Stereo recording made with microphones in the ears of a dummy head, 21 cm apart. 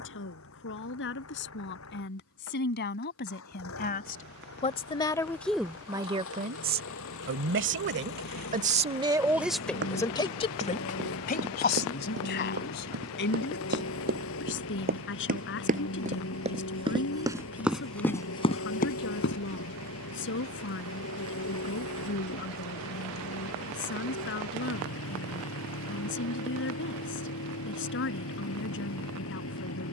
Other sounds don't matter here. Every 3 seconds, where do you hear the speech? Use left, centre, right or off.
left, left, right, left, left, left, left, left, left, left.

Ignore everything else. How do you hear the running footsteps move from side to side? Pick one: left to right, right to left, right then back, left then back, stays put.
right to left.